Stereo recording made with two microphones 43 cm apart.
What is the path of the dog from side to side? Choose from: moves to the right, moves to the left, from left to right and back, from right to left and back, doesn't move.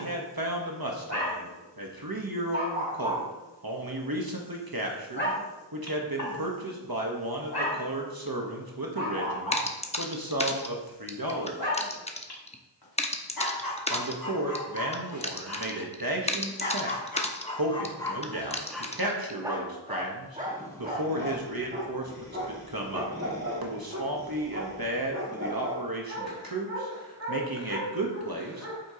from right to left and back.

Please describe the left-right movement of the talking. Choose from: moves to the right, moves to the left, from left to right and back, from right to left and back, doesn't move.
doesn't move.